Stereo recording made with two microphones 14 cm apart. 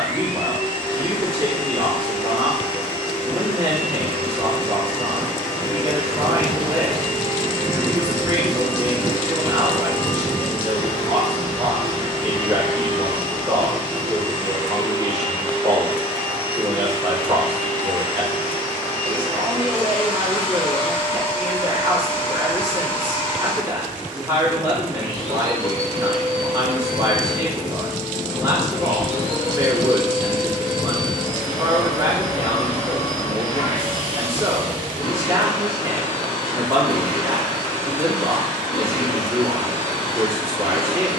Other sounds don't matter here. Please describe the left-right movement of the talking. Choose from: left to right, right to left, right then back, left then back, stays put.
stays put.